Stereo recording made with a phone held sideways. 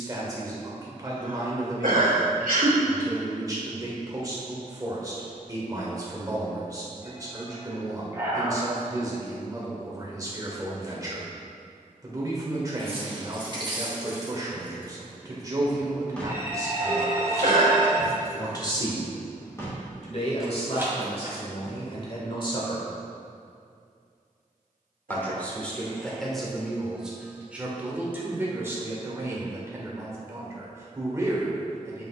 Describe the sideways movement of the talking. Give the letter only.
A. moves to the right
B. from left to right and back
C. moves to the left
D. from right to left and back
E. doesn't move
D.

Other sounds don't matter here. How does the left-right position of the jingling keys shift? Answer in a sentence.
In this clip you hear the jingling keys go left and come back.